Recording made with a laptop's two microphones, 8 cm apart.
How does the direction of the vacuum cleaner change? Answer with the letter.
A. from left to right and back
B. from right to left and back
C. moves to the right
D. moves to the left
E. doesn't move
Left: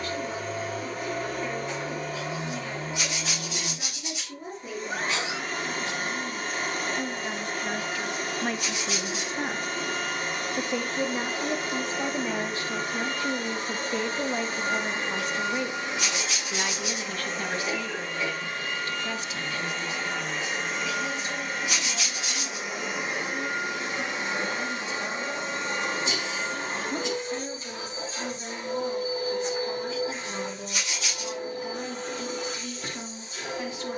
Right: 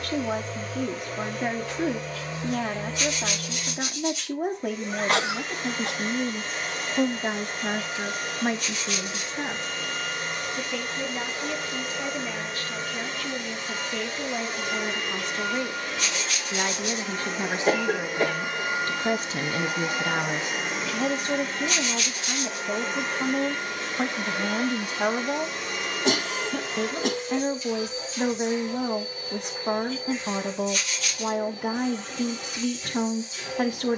A.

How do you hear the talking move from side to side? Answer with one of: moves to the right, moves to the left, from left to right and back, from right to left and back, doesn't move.
from right to left and back.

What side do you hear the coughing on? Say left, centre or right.
right.